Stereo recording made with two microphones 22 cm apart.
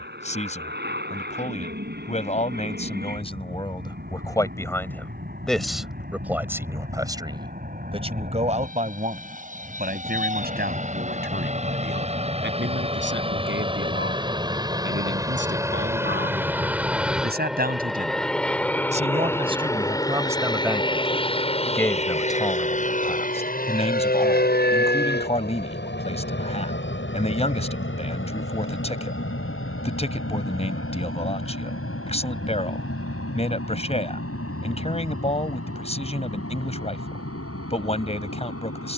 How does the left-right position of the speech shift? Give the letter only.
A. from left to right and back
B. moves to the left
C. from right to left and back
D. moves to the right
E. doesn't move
A.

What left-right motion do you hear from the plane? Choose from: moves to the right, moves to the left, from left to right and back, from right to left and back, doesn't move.
moves to the left.